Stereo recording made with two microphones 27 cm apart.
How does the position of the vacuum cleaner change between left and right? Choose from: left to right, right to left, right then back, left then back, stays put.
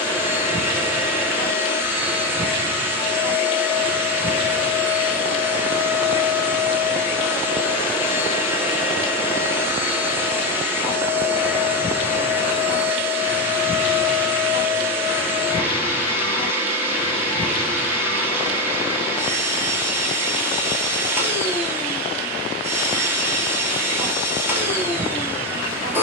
stays put.